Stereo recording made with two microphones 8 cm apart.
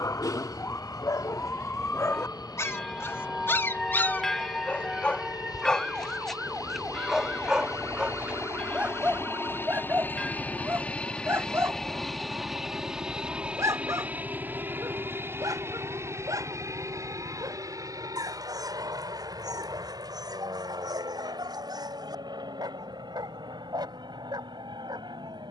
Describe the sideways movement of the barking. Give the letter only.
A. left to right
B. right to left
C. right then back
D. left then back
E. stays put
A.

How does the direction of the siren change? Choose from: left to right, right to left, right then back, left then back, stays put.
left to right.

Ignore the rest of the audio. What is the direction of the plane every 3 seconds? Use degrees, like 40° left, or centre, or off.
70° left, 60° left, 50° left, 20° left, 10° right, 30° right, 50° right, 60° right, 60° right.